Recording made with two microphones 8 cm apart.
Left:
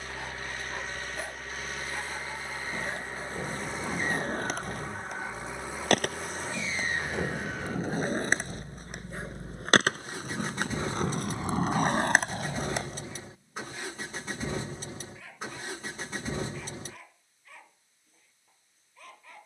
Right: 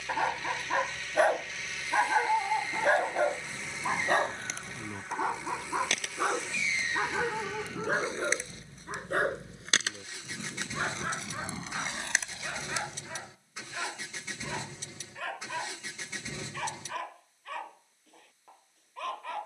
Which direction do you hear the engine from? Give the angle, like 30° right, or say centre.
40° left.